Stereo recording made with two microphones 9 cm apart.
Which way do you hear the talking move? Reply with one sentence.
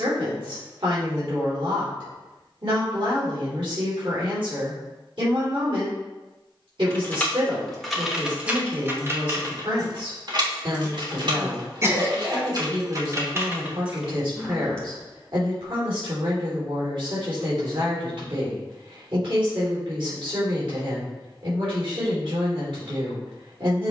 You can hear the talking stay put.